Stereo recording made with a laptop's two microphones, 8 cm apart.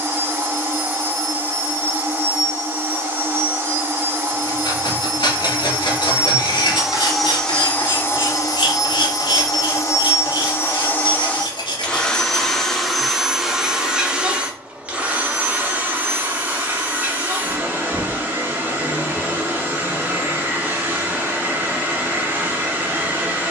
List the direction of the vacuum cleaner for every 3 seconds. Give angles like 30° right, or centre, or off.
30° right, 30° right, 10° left, 30° left, 10° right, 20° right, 20° right, 20° right.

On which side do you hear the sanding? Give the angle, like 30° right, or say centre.
80° left.